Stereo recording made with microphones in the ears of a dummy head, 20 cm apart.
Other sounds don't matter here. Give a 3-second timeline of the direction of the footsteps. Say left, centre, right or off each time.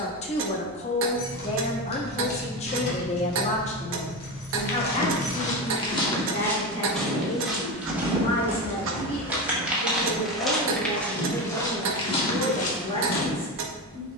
off, left, centre, centre, left.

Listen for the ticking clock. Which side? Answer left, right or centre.
right.